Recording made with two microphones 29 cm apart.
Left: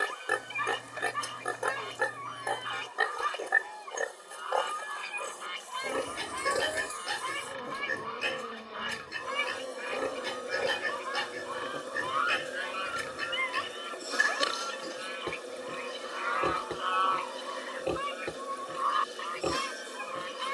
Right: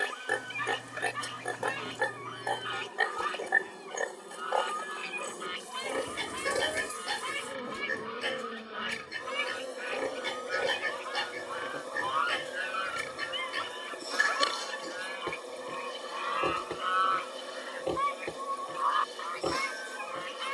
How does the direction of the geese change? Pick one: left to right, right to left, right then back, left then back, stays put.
right then back.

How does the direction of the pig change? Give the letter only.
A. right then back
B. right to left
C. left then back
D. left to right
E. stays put
E.